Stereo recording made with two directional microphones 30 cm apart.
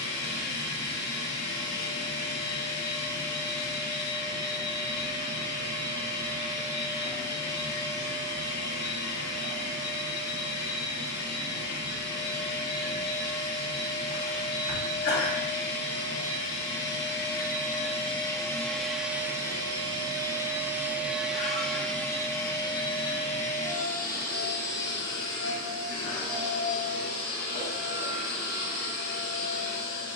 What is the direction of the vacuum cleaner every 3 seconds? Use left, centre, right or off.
left, left, left, left, left, left, centre, centre, left, left.